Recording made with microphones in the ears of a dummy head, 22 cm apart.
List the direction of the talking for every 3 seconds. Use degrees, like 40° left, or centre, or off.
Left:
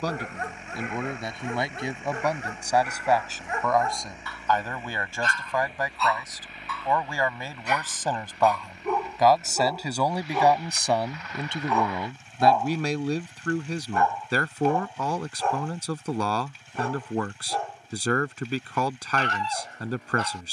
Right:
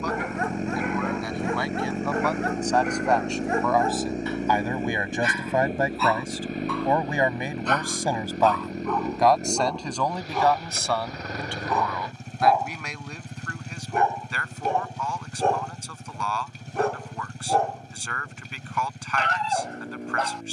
20° left, 10° right, 20° right, 10° left, 30° left, 30° left, 30° left.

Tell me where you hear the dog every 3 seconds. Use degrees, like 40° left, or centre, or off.
50° right, 20° right, 10° left, centre, 20° right, 40° right, 50° right.